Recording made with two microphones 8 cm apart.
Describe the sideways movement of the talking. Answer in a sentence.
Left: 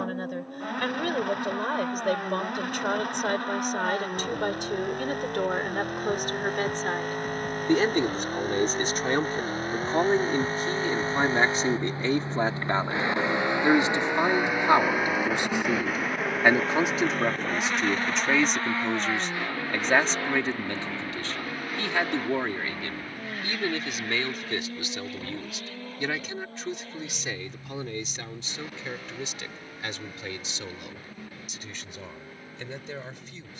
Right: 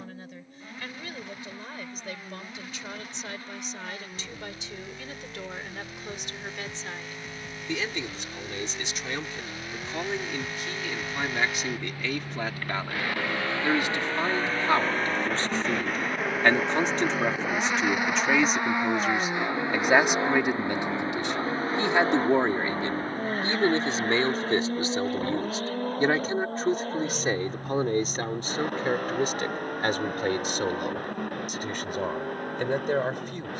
You can hear the talking move to the right.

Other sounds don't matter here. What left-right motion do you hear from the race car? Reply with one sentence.
In this clip you hear the race car go from the left side to the right.